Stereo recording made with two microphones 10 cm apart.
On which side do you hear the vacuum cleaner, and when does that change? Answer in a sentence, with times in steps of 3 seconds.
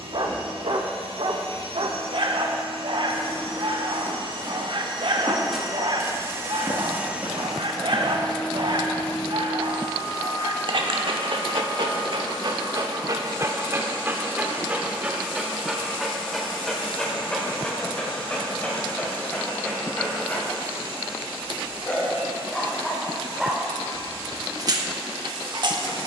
You can hear the vacuum cleaner on the right from 0 s, in the centre from 6 s and on the left from 9 s.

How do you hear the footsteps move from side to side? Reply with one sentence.
In this clip you hear the footsteps move from left to right.